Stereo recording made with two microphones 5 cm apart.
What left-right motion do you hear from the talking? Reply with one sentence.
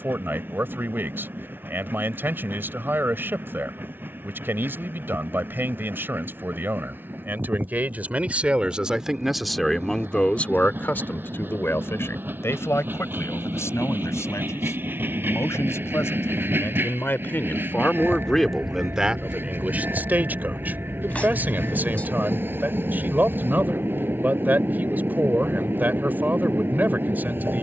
In this clip you hear the talking move from right to left and back again.